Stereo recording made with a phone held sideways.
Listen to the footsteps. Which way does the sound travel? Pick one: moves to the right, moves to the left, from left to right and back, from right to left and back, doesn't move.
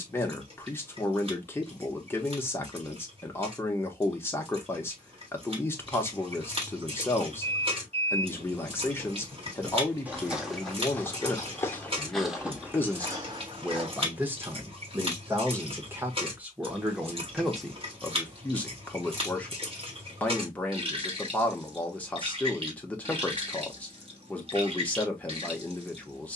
from right to left and back.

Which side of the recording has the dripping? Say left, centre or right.
right.